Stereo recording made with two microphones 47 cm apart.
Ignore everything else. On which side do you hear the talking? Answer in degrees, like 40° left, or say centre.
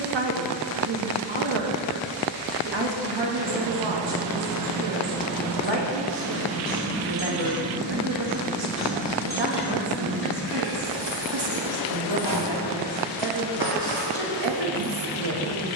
60° right.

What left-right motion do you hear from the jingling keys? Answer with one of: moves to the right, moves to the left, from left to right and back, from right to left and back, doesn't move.
moves to the left.